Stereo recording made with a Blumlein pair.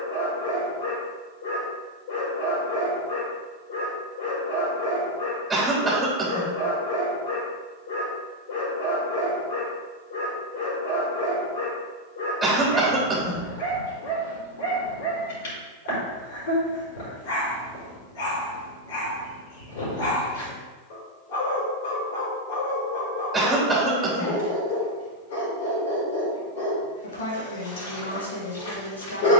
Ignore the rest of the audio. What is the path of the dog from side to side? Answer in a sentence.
In this clip you hear the dog stay put.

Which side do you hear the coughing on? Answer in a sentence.
You can hear the coughing in the centre.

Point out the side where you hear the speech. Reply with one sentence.
You can hear the speech on the left.